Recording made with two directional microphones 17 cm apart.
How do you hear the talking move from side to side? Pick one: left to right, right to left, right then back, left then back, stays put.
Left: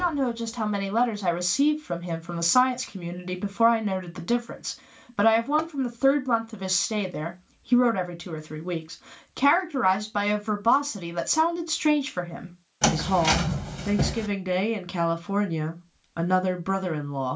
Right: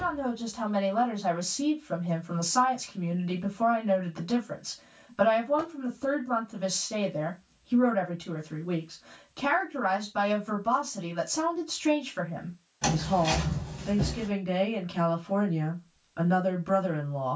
stays put.